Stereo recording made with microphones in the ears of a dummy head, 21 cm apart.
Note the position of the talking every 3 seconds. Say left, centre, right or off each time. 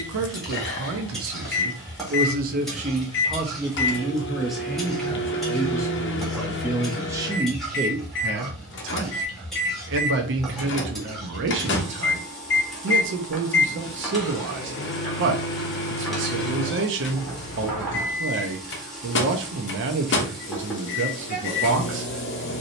right, centre, right, right, right, right, right, right.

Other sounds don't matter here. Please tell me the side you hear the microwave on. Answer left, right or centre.
left.